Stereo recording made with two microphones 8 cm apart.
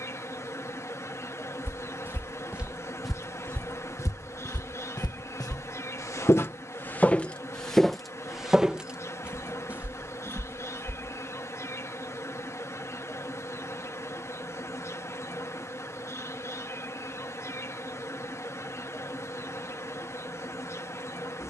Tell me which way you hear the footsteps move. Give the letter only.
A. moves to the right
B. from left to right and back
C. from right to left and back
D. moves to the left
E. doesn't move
C.